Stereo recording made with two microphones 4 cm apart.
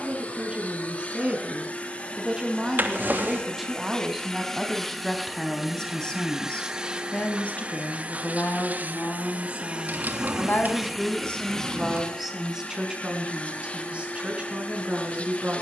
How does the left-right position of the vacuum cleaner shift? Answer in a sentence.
In this clip you hear the vacuum cleaner move from left to right and back again.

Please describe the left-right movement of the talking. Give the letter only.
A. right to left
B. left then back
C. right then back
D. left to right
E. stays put
B.